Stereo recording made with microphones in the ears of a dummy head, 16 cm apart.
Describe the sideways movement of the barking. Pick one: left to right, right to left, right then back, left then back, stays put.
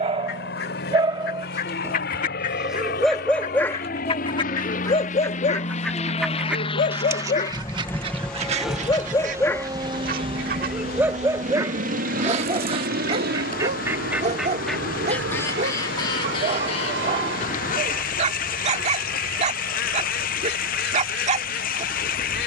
left then back.